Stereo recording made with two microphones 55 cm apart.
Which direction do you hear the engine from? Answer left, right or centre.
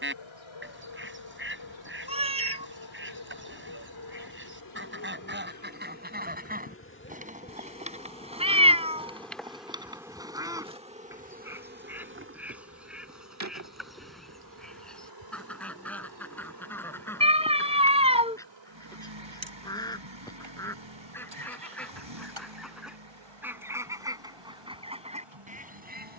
right.